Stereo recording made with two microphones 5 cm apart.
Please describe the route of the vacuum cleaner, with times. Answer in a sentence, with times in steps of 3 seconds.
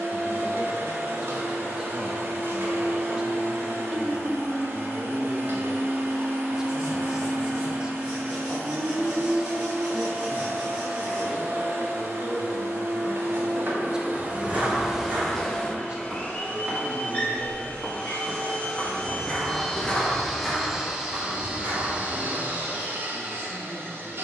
You can hear the vacuum cleaner on the right from 0 s, on the left from 15 s, in the centre from 18 s and on the right from 21 s.